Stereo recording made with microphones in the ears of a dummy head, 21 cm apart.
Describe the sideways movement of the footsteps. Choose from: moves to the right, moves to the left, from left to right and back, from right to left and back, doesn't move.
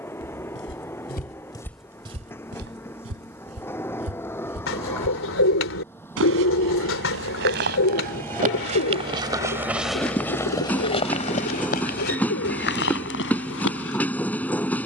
from left to right and back.